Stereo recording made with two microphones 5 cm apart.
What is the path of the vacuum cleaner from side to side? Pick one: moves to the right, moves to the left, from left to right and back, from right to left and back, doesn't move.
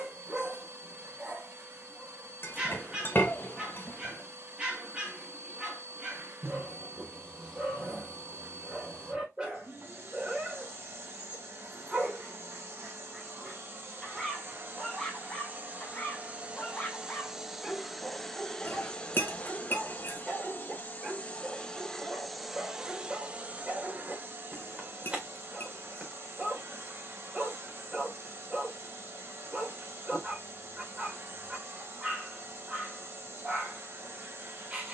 from right to left and back.